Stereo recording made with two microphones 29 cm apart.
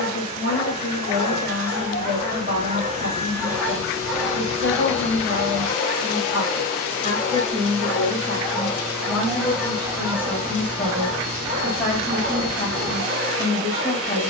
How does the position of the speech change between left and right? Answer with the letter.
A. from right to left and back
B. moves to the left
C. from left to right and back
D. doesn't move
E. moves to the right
B.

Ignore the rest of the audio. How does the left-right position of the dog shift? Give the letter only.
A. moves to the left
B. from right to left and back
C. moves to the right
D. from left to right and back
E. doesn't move
B.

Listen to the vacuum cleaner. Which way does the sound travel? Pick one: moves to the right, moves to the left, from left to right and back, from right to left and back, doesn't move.
doesn't move.